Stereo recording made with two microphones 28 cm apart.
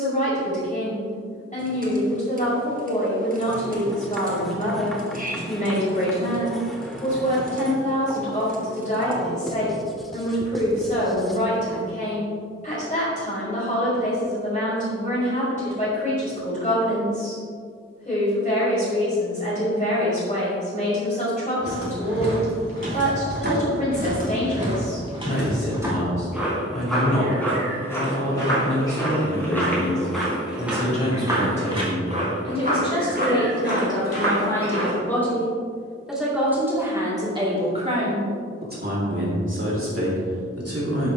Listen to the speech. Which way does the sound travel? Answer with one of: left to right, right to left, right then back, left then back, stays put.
left to right.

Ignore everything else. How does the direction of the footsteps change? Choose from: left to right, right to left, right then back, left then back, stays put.
left then back.